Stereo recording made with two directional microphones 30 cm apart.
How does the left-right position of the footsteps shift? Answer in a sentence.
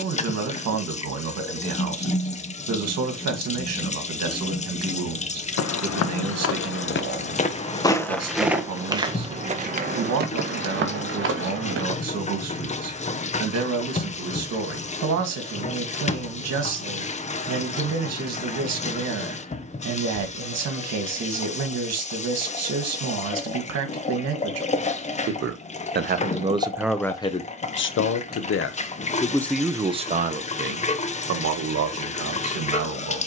You can hear the footsteps move from left to right.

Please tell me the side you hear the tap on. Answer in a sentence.
You can hear the tap on the left.